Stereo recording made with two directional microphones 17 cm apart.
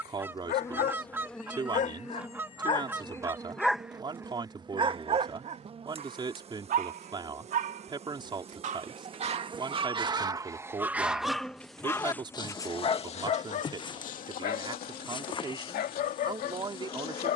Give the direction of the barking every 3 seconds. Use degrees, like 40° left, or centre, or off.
50° left, 20° right, 50° right, 20° right, 40° left, 60° left.